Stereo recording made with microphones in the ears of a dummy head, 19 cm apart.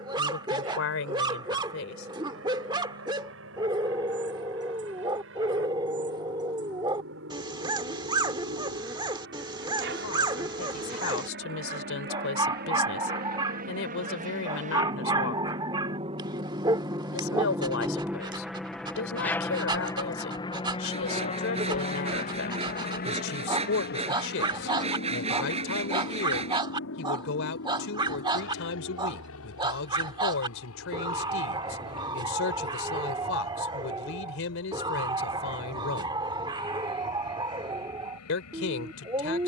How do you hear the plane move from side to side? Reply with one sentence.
You can hear the plane travel towards the left.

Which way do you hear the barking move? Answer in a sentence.
In this clip you hear the barking stay put.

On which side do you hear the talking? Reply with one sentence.
In this clip you hear the talking on the left.